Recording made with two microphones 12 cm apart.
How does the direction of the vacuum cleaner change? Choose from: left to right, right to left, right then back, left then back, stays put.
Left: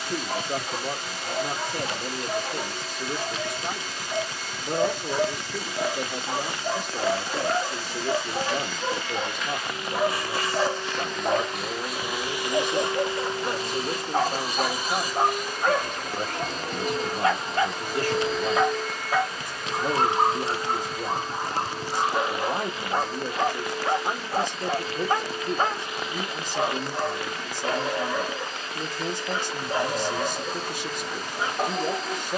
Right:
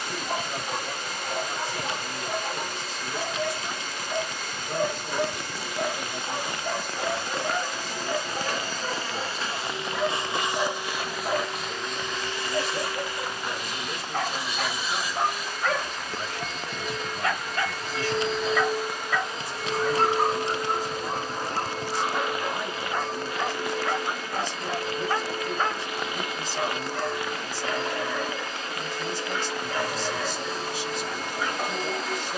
left then back.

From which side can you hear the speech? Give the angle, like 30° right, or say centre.
50° left.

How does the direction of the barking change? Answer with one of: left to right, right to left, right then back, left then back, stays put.
right to left.